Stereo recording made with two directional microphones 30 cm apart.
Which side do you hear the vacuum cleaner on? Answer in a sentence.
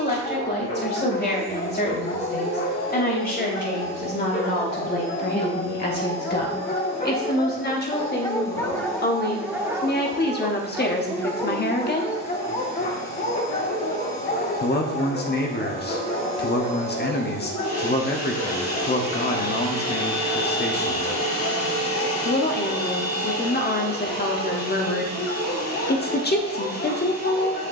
In this clip you hear the vacuum cleaner on the left.